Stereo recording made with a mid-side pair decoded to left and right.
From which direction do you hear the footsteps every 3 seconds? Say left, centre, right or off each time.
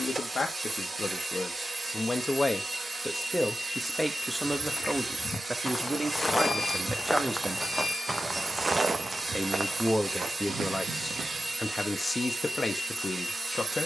off, left, centre, right, off.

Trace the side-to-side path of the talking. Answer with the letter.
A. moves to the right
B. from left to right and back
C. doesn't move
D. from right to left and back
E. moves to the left
B.